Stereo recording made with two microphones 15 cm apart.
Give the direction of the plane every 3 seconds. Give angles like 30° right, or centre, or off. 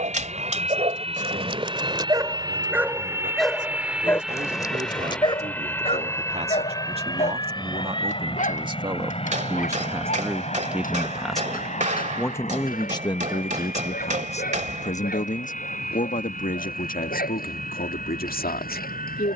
40° right, centre, 30° left, 40° left, 50° left, 50° left, 60° left.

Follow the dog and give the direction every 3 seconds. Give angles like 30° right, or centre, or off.
30° right, 20° left, 50° left, 60° left, 70° left, 70° left, 80° left.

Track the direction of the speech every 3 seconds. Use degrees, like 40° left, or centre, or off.
60° right, 50° right, 40° right, 10° right, 30° left, 60° left, 70° left.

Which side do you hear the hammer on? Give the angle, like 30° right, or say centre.
50° right.